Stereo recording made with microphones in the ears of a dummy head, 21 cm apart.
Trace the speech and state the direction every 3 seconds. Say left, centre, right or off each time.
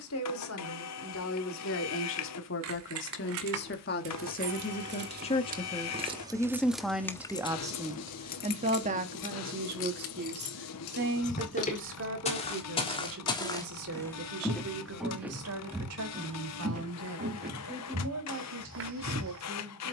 left, left, centre, right, right, right, right.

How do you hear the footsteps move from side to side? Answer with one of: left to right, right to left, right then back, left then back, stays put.
left to right.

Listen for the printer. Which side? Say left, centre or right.
left.